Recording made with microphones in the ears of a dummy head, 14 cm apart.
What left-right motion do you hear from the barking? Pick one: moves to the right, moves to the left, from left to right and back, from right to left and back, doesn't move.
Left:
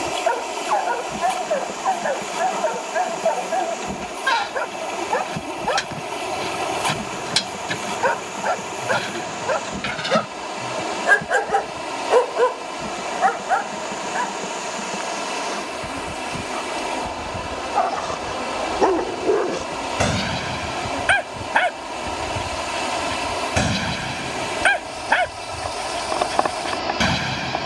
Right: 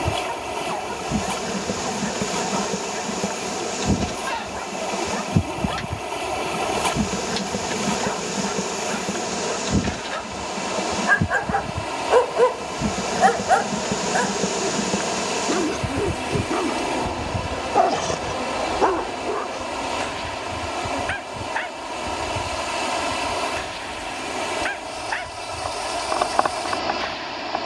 from left to right and back.